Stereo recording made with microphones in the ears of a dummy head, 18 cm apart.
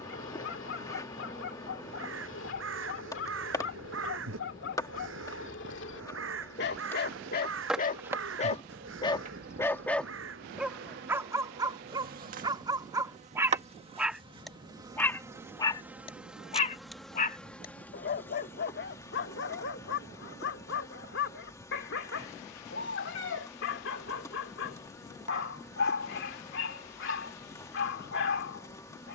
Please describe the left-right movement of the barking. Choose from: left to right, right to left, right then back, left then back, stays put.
right then back.